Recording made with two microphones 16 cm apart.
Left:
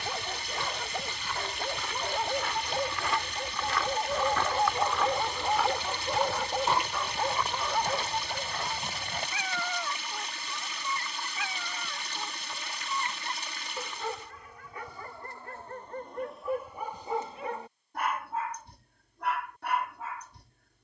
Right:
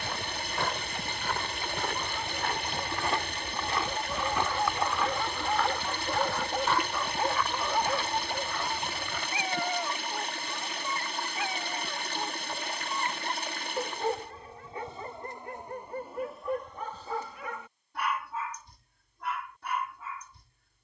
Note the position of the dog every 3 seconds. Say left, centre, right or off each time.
left, left, centre, right, right, centre, left.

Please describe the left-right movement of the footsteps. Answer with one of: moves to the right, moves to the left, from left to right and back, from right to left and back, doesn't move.
moves to the left.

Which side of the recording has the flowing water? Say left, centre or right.
right.